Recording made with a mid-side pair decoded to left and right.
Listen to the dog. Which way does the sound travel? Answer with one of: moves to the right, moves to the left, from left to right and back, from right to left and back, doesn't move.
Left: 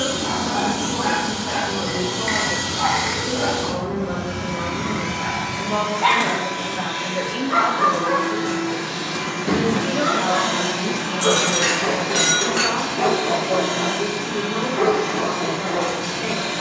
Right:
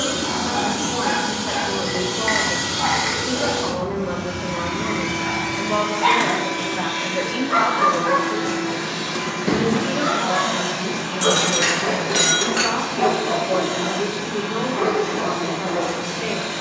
from left to right and back.